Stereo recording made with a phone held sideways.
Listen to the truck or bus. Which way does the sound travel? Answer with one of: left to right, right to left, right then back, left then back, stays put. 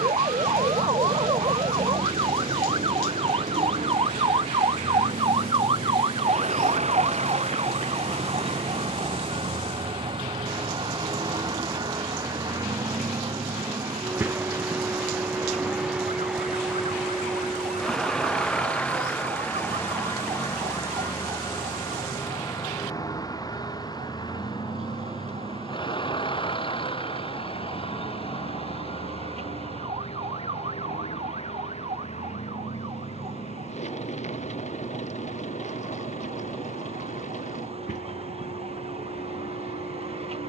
right to left.